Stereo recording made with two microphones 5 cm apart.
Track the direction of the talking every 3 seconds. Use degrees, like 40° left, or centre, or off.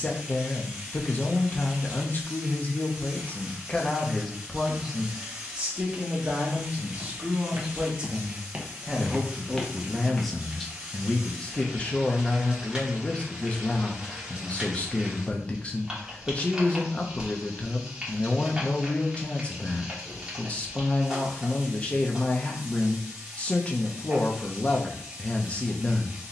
40° left, centre, 20° right, 10° left, 30° left, 30° left, 30° left, 30° left, 30° left.